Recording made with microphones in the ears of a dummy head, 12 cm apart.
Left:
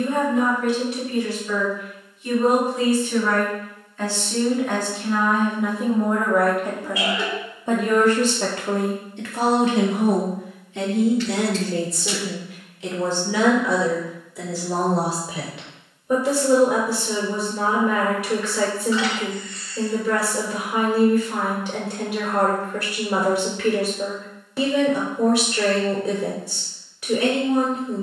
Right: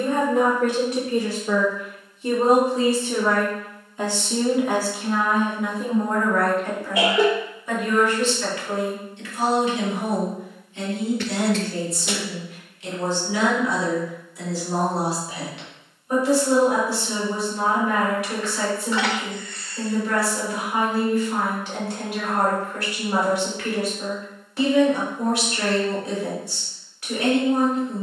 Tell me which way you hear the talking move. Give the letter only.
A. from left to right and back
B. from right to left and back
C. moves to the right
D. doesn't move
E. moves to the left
E.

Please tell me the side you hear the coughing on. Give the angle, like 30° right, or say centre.
40° right.